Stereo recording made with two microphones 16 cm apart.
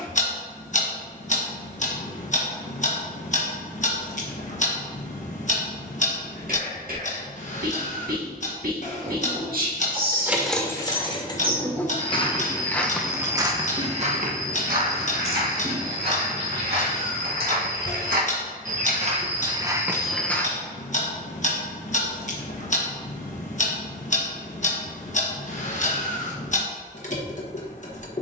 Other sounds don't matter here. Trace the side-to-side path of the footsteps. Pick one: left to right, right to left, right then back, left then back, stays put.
right then back.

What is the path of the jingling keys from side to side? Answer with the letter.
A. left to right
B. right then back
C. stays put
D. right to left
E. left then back
E.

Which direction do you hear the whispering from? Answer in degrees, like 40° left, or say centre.
60° right.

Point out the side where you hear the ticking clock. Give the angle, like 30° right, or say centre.
50° left.